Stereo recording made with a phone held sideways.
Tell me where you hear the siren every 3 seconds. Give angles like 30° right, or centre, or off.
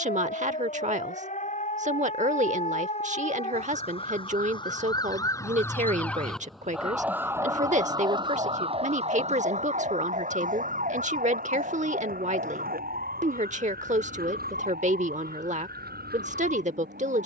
50° left, 30° left, 20° right, 60° right, 70° right, 80° right.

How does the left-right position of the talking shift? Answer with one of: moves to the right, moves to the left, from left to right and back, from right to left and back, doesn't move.
doesn't move.